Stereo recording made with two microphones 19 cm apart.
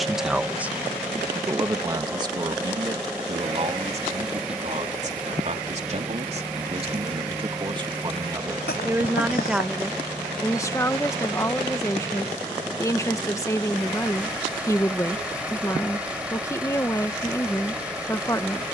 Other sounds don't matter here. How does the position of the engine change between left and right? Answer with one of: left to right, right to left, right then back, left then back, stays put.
stays put.